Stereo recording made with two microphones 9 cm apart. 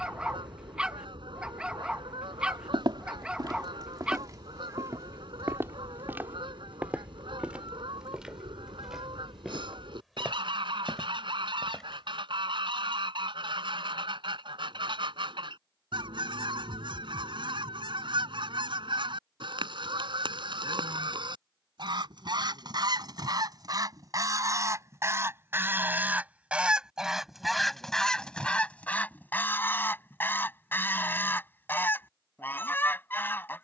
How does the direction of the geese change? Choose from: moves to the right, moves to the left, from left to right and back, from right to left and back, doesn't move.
moves to the left.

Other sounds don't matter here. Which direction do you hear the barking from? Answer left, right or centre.
centre.